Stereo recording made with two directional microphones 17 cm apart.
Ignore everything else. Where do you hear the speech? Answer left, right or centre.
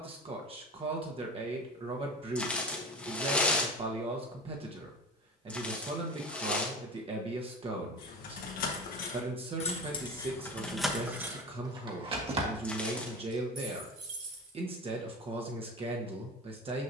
right.